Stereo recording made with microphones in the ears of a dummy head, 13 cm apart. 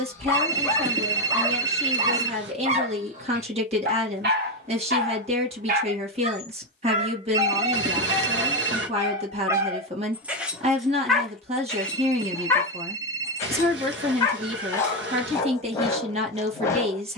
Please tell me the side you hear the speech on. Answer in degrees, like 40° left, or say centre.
40° right.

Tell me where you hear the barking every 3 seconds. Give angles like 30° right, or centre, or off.
10° right, 60° right, 40° right, 10° right, 20° left, 20° left.